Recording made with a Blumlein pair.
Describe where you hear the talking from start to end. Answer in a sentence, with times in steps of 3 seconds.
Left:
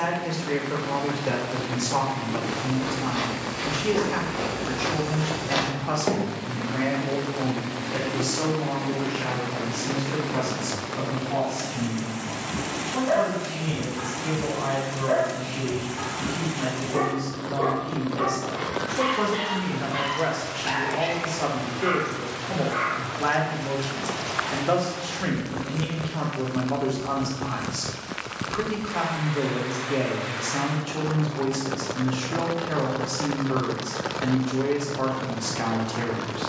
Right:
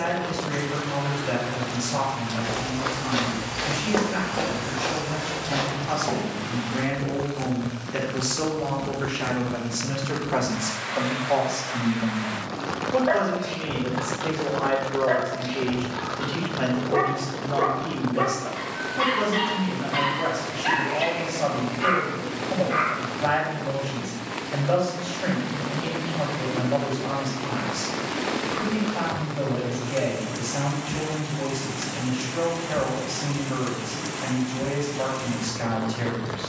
You can hear the talking on the left from 0 s, in the centre from 6 s, on the right from 9 s, in the centre from 18 s and on the left from 21 s.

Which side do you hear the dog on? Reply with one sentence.
You can hear the dog on the right.